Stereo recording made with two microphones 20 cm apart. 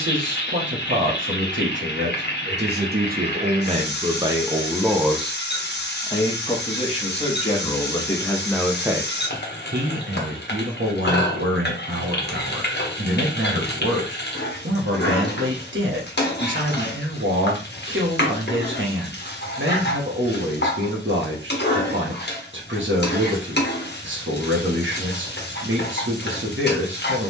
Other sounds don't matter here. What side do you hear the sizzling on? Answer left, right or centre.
left.